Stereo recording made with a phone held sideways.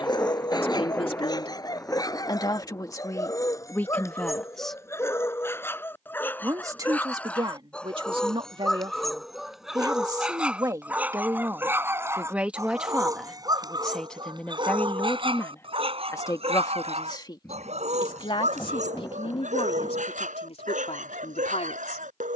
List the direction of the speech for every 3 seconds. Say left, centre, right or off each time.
left, centre, right, right, centre, left, left, left.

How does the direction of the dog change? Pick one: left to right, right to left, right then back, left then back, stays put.
left to right.